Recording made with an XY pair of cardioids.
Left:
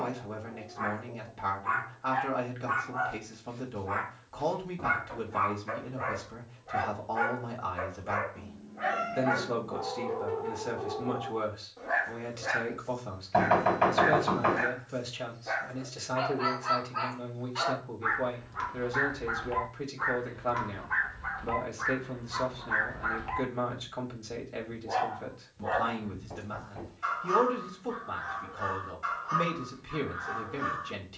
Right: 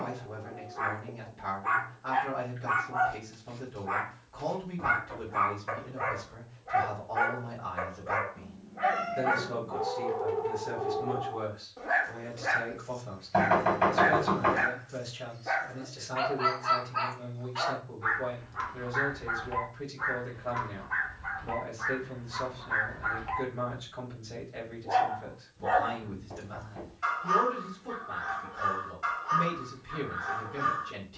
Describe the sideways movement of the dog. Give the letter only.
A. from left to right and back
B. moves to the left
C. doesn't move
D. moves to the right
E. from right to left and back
E.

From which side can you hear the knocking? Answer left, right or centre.
centre.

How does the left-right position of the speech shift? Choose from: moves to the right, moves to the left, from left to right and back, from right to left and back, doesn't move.
doesn't move.